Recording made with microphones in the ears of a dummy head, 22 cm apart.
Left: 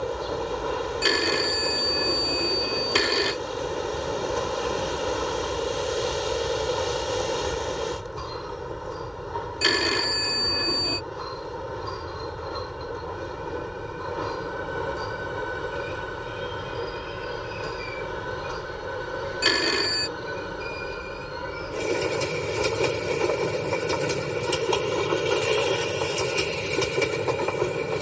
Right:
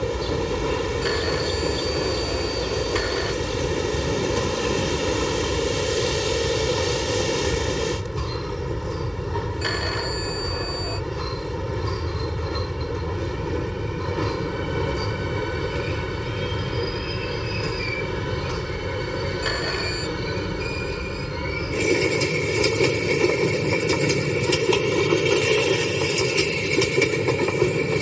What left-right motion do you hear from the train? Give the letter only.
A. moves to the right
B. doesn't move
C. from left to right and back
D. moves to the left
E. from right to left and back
B.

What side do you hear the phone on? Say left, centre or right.
left.